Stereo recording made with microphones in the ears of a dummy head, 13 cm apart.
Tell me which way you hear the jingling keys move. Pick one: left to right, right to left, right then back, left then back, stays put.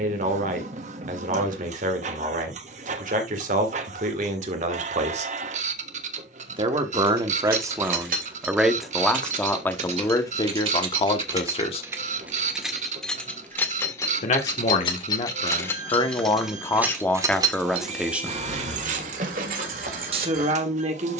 left then back.